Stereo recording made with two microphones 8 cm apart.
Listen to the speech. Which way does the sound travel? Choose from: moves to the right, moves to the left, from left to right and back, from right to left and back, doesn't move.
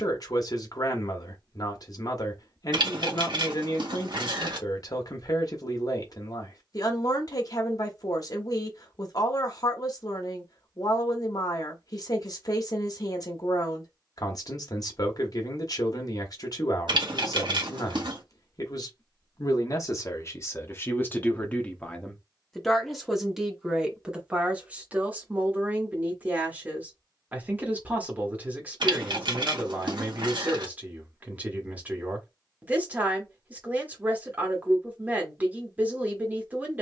moves to the right.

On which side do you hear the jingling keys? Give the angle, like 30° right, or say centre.
70° right.